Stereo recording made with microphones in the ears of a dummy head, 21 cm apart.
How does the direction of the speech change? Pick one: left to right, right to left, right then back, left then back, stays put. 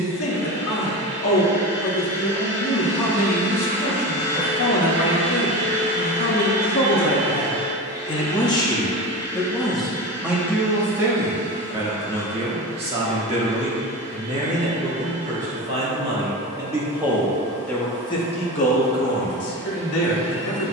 right then back.